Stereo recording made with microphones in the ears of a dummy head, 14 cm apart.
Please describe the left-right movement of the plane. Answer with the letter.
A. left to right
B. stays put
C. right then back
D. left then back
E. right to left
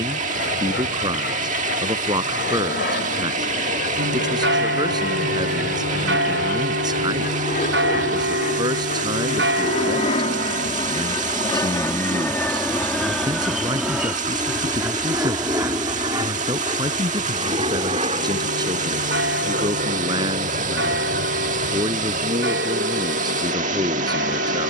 A.